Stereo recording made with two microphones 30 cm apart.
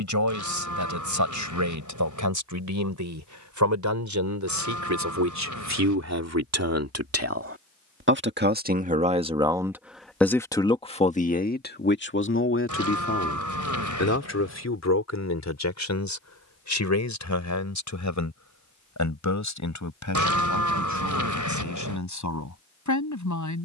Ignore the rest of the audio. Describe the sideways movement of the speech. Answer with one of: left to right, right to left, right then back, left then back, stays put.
right to left.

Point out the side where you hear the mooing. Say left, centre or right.
right.